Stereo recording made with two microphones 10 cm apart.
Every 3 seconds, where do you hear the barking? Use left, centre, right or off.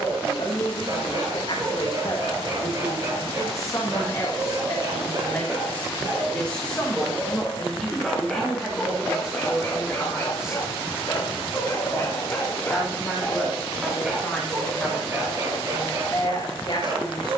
right, right, centre, left, centre, right.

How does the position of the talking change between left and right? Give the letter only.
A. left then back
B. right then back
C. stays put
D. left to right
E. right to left
B.